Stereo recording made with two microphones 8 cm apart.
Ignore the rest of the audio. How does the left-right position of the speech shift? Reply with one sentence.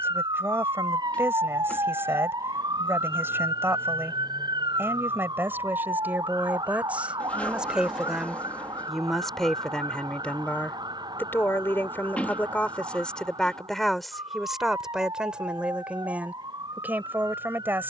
In this clip you hear the speech go left and come back.